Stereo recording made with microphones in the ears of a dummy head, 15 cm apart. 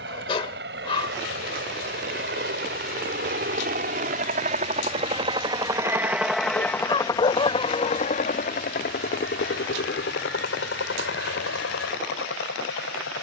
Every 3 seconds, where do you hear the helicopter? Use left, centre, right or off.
right, right, left, left, left.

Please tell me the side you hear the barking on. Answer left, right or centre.
left.